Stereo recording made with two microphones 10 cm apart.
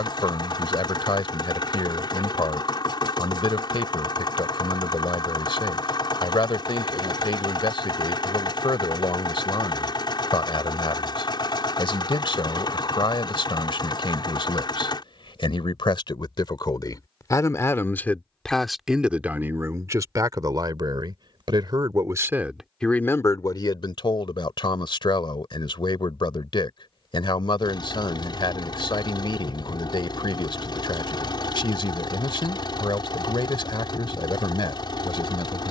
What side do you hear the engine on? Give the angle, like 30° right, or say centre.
50° left.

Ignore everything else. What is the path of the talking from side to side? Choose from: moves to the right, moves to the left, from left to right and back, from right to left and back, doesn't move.
from left to right and back.